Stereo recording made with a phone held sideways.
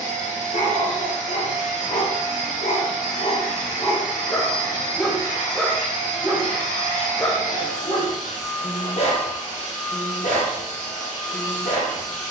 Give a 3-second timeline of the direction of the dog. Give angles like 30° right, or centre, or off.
60° left, 20° left, 20° left, 60° left.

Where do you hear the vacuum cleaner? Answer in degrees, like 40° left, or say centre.
60° left.